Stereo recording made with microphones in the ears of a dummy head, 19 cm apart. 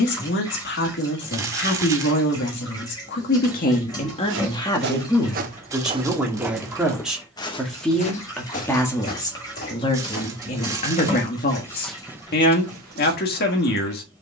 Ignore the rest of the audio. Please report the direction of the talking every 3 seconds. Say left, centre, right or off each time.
left, left, centre, left, left.